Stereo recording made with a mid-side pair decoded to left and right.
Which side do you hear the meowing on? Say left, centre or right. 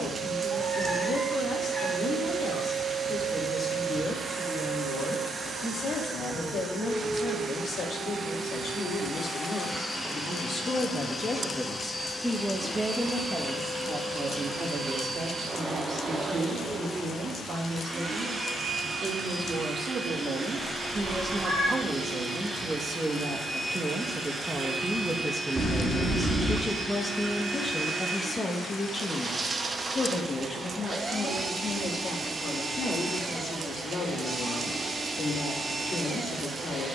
right.